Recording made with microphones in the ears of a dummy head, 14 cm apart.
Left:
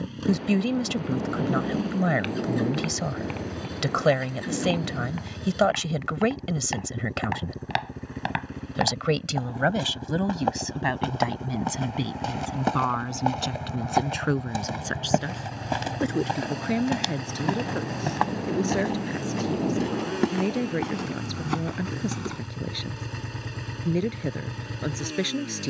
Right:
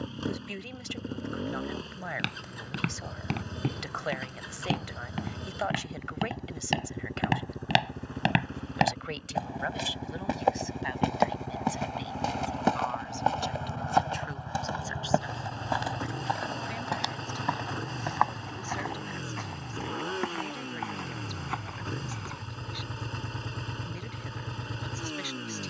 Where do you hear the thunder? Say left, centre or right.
left.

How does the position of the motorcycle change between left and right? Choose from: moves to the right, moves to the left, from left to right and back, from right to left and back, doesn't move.
doesn't move.